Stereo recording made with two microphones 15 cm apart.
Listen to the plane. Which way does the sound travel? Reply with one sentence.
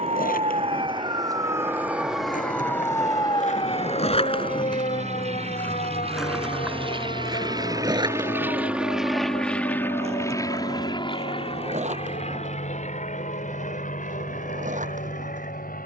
You can hear the plane move to the left.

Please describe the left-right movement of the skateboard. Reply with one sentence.
In this clip you hear the skateboard travel towards the right.